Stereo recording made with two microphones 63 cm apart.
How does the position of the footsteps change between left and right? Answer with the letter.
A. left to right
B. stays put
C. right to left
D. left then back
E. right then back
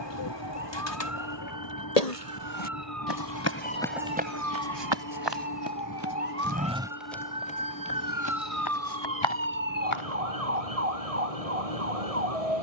E.